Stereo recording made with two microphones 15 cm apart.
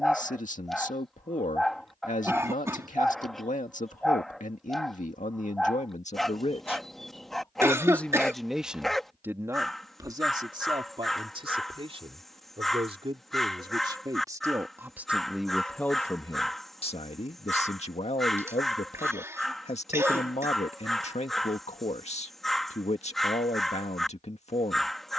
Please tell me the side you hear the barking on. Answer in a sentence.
In this clip you hear the barking in the centre.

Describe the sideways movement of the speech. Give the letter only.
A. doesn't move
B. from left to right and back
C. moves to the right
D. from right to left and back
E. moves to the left
B.